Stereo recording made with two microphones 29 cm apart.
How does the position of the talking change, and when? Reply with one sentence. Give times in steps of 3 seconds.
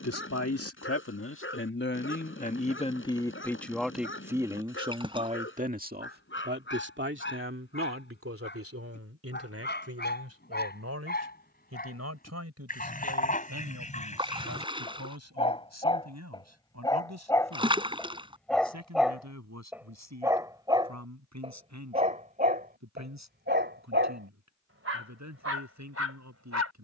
You can hear the talking on the left from 0 s, in the centre from 3 s and on the right from 6 s.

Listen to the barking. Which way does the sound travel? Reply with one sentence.
In this clip you hear the barking move from left to right.